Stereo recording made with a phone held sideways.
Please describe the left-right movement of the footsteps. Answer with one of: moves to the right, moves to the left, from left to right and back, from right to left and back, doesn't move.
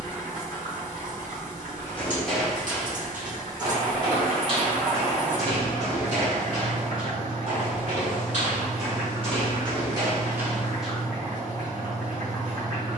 from left to right and back.